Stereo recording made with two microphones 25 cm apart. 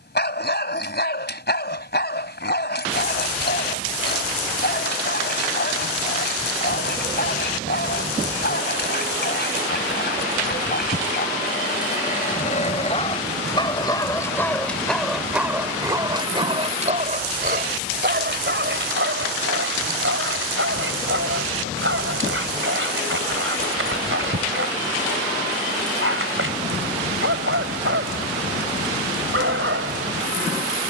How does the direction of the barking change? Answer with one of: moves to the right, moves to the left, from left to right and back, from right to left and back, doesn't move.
moves to the right.